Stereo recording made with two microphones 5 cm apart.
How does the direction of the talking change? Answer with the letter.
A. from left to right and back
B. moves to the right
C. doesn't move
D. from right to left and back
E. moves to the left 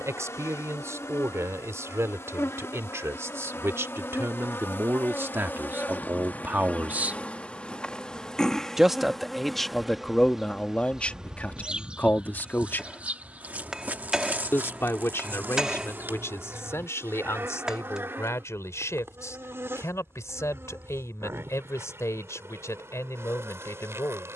E.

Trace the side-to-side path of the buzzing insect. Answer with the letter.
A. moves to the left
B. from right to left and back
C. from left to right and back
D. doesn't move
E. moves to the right
E.